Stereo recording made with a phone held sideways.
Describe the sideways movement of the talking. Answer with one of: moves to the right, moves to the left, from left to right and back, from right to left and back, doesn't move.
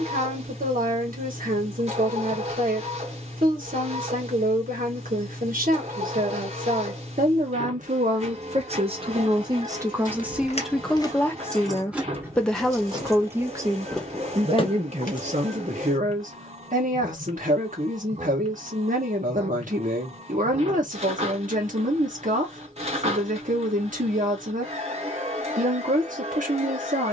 from right to left and back.